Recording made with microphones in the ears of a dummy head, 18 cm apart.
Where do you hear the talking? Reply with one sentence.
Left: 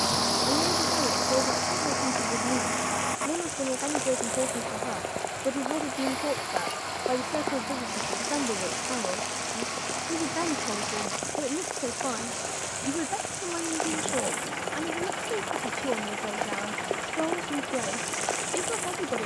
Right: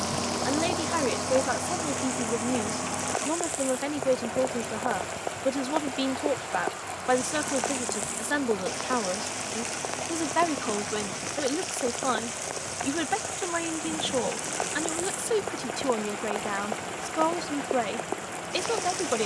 In this clip you hear the talking on the right.